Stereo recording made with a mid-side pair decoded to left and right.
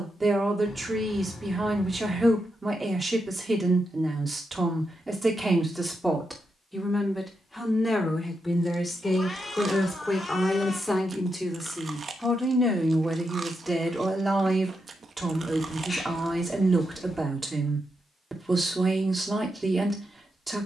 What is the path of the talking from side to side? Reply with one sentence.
In this clip you hear the talking move from right to left and back again.